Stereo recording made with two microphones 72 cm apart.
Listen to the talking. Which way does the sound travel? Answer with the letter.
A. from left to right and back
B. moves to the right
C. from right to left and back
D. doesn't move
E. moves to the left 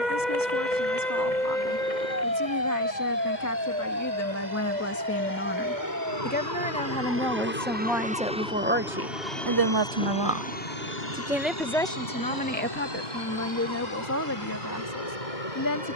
A.